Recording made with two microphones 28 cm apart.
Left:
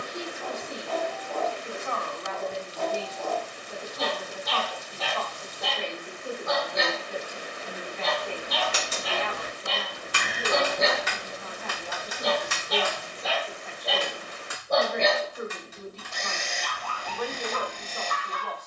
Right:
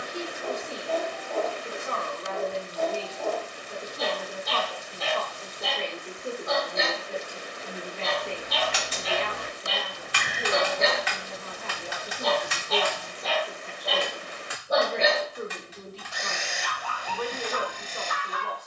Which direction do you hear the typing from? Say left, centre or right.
left.